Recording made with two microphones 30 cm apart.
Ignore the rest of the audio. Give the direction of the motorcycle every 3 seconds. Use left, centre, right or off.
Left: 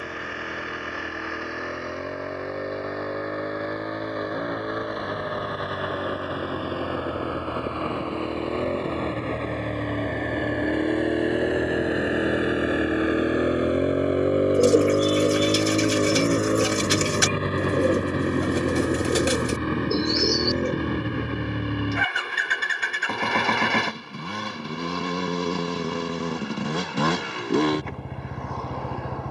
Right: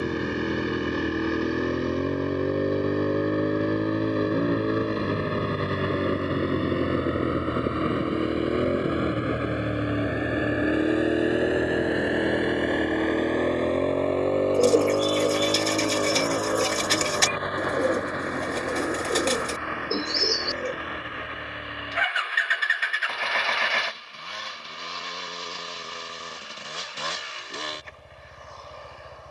right, right, right, centre, centre, left, left, left, left, left.